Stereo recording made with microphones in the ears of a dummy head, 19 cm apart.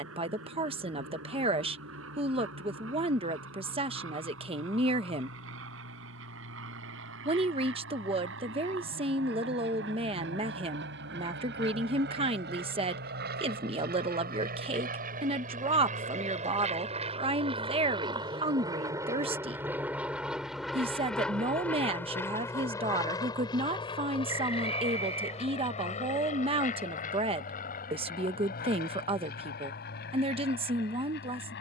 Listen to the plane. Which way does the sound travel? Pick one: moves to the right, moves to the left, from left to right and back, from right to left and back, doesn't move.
moves to the left.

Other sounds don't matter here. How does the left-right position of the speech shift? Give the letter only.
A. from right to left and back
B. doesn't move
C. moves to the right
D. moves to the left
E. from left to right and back
B.